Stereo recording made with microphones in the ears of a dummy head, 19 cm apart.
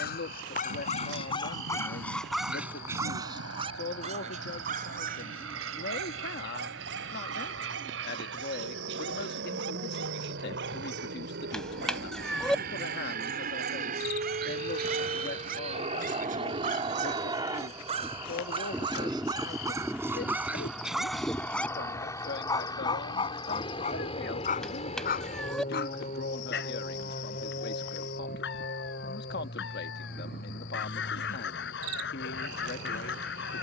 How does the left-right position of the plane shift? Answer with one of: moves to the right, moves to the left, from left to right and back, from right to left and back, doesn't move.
moves to the left.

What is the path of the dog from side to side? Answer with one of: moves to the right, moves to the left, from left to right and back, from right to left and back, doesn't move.
from left to right and back.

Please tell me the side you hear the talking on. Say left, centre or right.
left.